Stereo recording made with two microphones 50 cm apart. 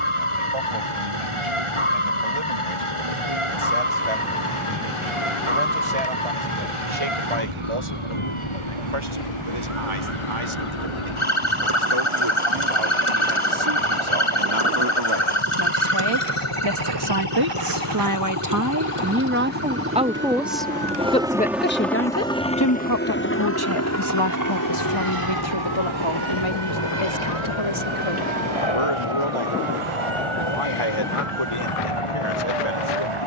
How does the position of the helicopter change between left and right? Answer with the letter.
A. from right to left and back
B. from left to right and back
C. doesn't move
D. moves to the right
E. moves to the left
E.